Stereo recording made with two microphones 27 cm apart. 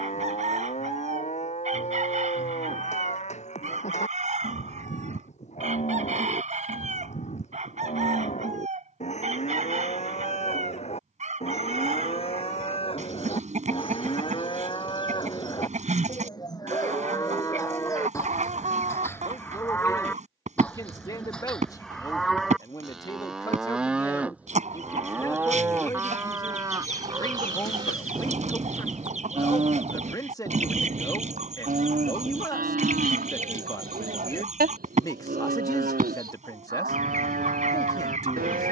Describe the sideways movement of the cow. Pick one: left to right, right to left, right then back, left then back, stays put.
left to right.